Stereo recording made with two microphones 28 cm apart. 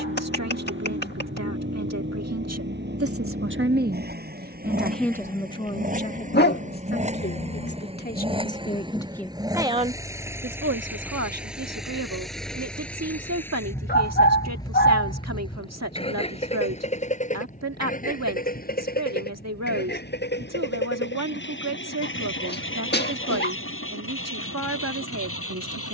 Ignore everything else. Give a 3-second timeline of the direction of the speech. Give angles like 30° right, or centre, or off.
70° right, 10° right, 30° left, 50° right, 70° right, 70° right, 70° right, 70° right, 70° right.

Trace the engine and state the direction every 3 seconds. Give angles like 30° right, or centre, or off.
40° right, 30° right, 20° right, 10° right, 10° left, 20° left, 40° left, 50° left, 50° left.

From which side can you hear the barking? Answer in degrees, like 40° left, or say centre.
40° left.